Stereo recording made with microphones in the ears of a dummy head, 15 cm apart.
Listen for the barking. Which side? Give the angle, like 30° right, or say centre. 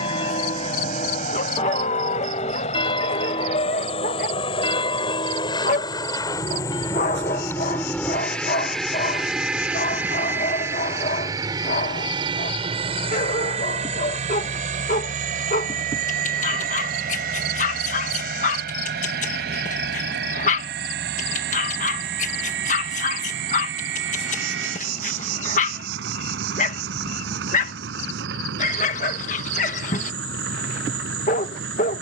50° left.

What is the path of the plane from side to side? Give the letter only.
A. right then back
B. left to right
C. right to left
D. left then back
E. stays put
B.